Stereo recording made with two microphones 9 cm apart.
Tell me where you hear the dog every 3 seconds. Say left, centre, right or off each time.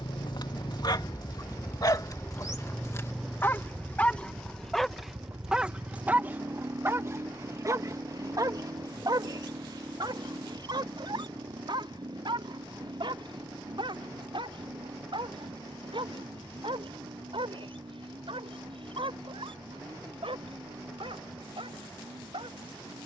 left, centre, right, right, right, right, right, right.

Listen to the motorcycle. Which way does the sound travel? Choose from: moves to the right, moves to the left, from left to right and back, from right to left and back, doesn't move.
moves to the right.